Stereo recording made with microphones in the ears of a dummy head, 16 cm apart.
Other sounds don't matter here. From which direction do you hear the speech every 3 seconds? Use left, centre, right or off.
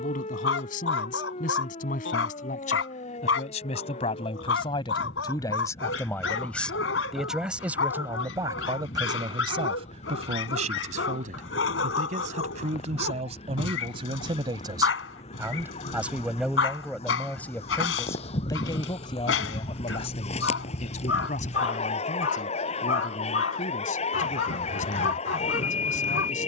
left, left, centre, right, right, centre, left, left, left.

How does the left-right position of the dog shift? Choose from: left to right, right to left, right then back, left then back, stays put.
stays put.